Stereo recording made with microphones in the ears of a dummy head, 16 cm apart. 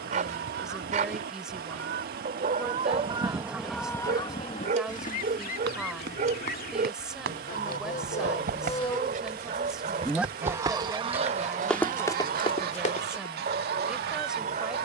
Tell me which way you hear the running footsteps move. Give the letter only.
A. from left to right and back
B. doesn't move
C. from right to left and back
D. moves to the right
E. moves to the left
E.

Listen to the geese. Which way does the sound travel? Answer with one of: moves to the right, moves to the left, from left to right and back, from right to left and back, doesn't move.
from right to left and back.